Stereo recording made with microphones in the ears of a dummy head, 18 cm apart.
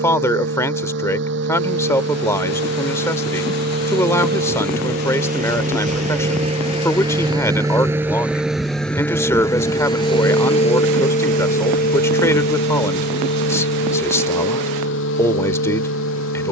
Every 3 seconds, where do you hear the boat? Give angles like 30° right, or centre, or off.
60° right, 50° right, 20° right, 30° left, 60° left, 70° left.